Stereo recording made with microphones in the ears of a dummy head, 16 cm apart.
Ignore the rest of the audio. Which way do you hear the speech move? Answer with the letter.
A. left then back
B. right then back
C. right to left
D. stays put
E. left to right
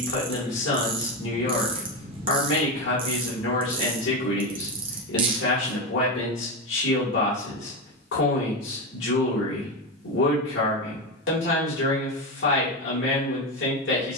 D.